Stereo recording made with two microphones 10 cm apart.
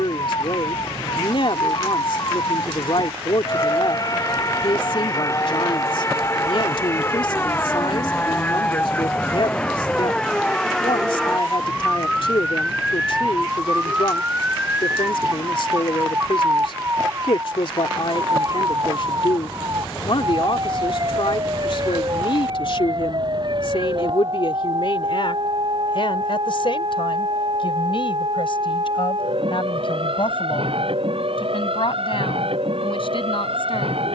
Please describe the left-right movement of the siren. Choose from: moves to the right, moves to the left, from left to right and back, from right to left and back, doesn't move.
moves to the right.